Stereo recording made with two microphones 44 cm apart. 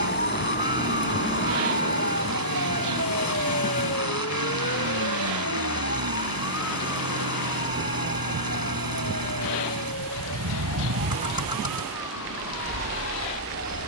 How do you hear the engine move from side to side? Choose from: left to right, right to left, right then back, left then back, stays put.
stays put.